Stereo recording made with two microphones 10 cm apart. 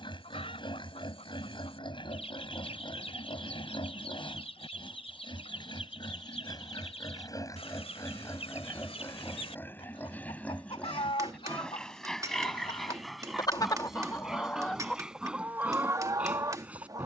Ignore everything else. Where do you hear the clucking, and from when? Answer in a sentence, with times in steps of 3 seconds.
You can hear the clucking on the left from 0 s and on the right from 15 s.